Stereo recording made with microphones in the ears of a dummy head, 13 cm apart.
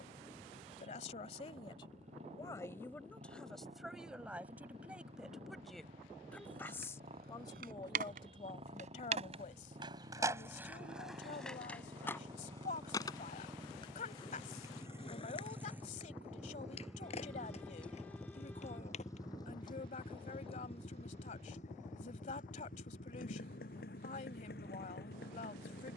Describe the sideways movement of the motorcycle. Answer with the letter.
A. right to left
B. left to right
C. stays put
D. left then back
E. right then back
A.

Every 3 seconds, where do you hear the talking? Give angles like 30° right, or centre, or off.
30° left, centre, 30° left, 50° left, 50° left, 50° left, 50° left, 50° left, 50° left.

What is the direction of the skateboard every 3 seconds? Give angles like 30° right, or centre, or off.
off, off, 70° right, 20° right, 30° left, 40° left, 50° left, off, off.